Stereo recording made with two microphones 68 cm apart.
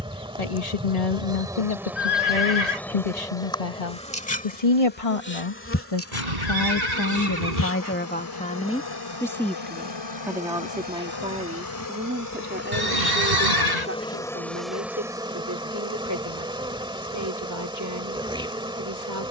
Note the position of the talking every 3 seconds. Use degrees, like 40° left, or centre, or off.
60° left, 60° left, 20° left, centre, 20° right, 30° right, 30° right.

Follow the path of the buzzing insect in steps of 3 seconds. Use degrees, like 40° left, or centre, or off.
centre, 10° left, 30° left, 40° left, 10° left, 10° right, 10° right.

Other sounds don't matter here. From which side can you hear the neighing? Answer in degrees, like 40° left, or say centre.
80° right.